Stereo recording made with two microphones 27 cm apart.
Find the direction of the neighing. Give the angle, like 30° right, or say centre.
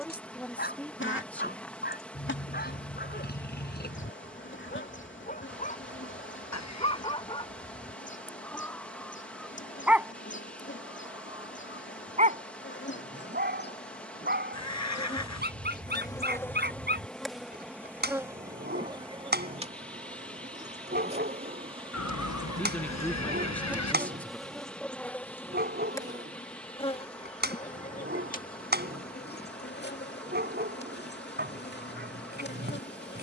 80° left.